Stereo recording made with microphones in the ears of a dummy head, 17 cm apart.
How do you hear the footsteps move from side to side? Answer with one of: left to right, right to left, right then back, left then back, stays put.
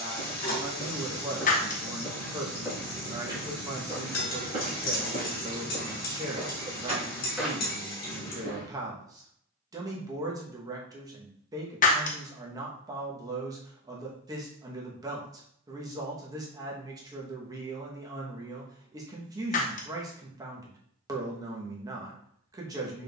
right then back.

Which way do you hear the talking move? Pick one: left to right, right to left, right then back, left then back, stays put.
stays put.